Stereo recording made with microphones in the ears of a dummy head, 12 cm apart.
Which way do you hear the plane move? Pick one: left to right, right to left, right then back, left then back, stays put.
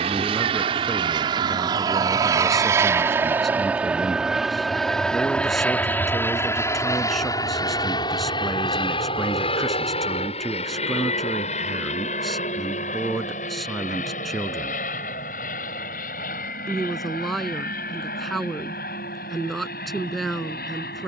right to left.